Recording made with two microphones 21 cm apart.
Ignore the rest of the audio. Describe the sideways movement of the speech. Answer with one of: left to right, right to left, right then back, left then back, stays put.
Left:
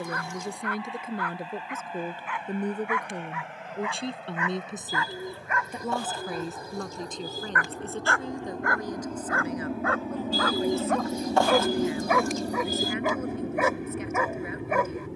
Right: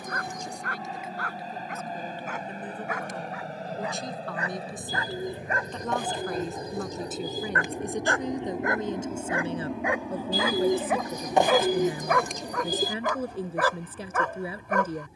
left to right.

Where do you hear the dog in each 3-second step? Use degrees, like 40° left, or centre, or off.
50° right, 40° right, 30° right, 10° right, 10° left.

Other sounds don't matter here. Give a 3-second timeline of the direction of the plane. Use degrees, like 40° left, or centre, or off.
50° right, 40° right, 20° right, 20° left, 60° left.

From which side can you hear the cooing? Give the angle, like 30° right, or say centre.
20° right.